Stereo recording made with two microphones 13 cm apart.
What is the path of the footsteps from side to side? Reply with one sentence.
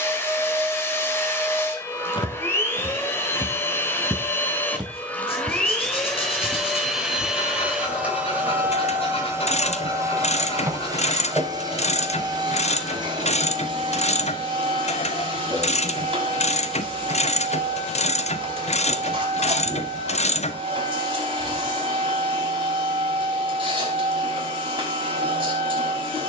You can hear the footsteps go from the left side to the right.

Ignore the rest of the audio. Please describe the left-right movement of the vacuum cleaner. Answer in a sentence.
In this clip you hear the vacuum cleaner move to the right.